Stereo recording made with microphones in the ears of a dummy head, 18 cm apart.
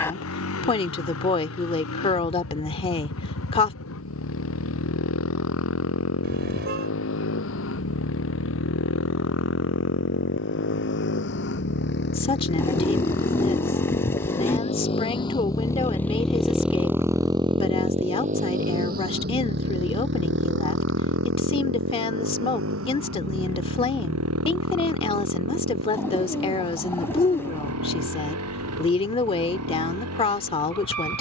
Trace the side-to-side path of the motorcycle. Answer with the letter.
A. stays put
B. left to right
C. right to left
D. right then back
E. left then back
B.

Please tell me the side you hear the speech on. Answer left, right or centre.
left.